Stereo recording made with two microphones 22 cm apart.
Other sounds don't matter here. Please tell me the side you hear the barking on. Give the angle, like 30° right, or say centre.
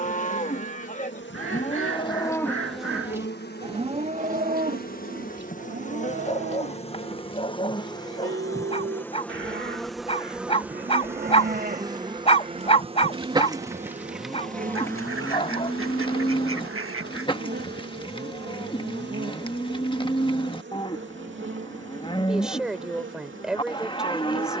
30° left.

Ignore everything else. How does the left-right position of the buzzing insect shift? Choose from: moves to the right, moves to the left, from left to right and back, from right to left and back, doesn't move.
moves to the right.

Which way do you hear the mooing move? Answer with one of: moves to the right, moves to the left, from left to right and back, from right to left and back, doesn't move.
from left to right and back.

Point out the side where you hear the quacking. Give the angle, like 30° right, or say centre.
80° right.